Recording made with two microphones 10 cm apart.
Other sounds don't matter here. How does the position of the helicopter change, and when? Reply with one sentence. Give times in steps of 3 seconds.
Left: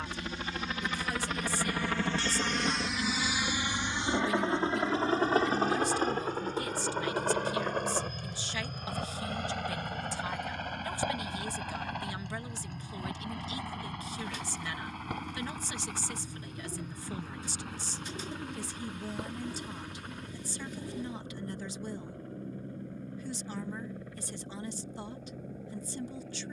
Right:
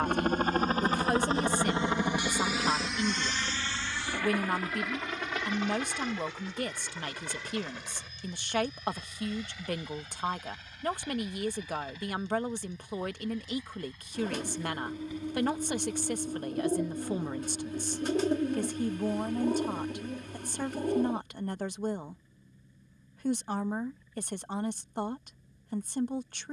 You can hear the helicopter on the right from 0 s and on the left from 3 s.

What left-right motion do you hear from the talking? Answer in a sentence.
You can hear the talking stay put.